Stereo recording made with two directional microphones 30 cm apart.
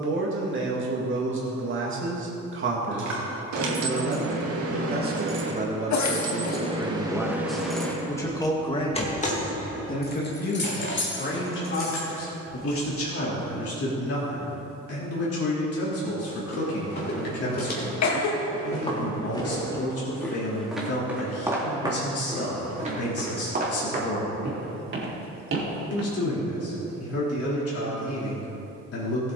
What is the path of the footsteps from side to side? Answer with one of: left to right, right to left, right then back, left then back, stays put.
left to right.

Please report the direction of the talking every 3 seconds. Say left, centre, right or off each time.
right, right, centre, left, left, left, left, left, left, left.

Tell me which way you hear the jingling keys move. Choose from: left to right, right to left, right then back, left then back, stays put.
right to left.